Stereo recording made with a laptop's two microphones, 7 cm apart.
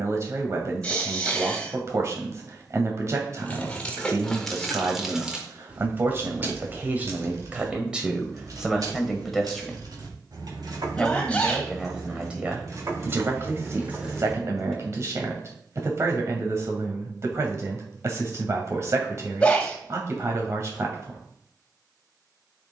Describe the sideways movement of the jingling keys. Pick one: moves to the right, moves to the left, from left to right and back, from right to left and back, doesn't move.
from left to right and back.